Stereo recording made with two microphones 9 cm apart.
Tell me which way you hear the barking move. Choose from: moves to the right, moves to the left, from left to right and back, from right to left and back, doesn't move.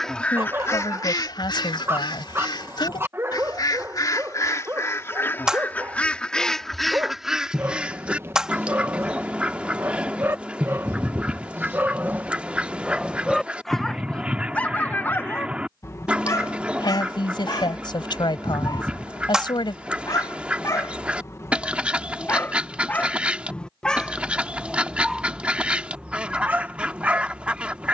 from right to left and back.